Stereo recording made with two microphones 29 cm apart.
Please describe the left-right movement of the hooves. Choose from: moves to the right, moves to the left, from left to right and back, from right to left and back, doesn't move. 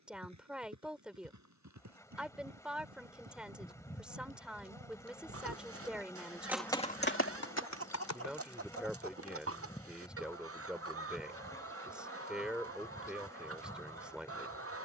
moves to the left.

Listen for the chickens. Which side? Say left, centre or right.
right.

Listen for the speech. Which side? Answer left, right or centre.
centre.